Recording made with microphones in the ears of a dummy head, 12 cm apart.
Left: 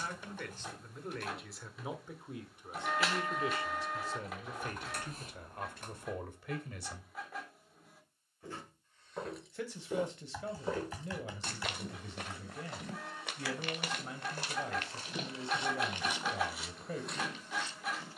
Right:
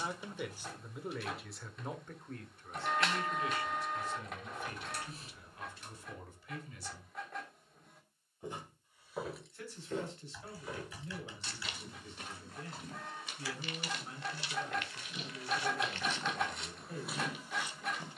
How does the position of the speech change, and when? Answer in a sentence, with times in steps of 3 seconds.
In this clip you hear the speech in the centre from 0 s and on the left from 3 s.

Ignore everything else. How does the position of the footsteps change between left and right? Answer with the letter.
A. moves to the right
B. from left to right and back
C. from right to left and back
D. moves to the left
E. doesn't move
C.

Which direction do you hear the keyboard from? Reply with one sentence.
You can hear the keyboard on the left.